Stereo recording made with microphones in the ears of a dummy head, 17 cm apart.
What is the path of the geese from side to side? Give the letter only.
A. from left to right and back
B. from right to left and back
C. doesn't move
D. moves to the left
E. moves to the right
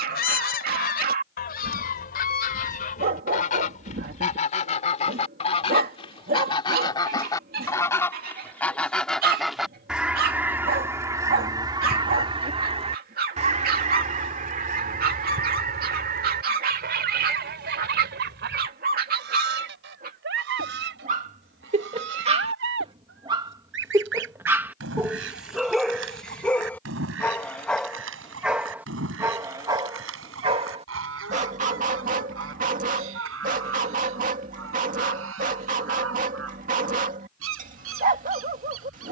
E.